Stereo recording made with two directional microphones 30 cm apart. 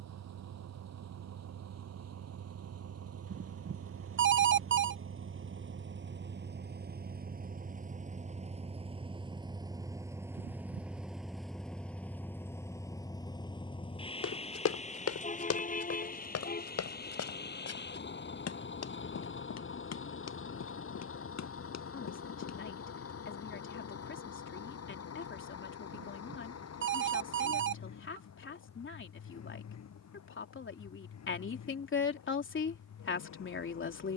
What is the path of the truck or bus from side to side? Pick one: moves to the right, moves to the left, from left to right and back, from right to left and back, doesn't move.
moves to the left.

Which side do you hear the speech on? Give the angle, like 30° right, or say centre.
40° left.